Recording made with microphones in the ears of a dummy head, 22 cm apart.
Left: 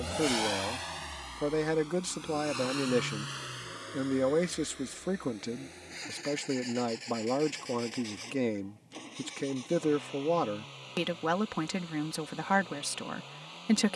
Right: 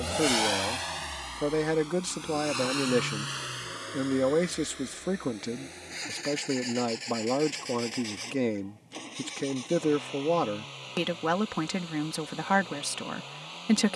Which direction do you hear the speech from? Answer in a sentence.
You can hear the speech in the centre.